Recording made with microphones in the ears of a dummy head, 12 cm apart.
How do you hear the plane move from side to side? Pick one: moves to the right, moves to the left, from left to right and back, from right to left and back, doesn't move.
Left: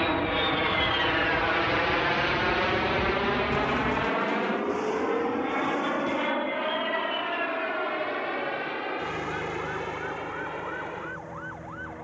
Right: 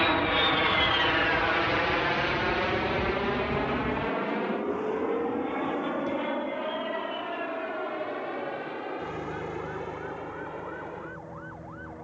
moves to the left.